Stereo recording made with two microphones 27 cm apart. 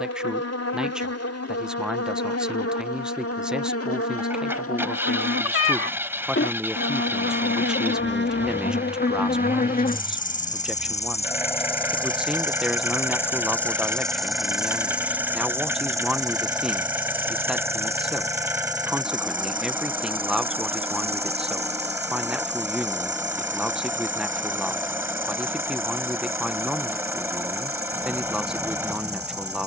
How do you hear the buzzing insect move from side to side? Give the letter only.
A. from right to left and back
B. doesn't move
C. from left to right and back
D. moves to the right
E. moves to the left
D.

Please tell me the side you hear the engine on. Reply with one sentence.
In this clip you hear the engine in the centre.